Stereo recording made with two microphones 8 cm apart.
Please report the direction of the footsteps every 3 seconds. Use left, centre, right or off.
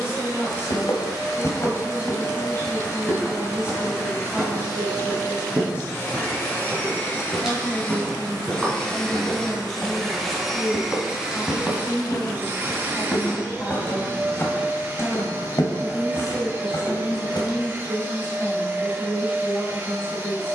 left, centre, centre, centre, left, left, off.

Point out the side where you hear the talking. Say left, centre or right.
left.